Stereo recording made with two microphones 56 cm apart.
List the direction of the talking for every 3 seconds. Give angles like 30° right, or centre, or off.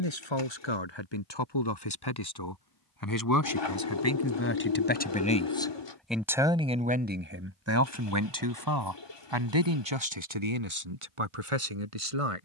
50° left, 20° left, 20° right, 60° right.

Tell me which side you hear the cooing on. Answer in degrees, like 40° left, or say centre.
50° left.